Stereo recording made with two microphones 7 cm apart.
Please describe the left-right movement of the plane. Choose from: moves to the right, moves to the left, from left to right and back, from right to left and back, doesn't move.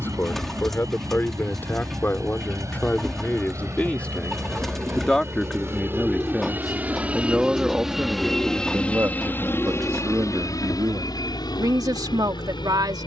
moves to the left.